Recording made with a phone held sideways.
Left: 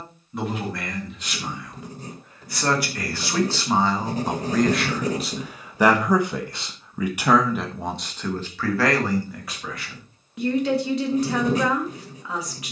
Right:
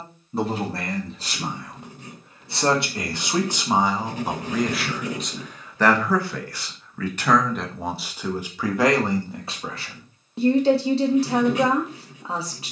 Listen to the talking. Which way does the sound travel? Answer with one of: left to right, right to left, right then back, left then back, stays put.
left then back.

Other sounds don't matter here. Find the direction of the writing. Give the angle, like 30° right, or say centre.
40° left.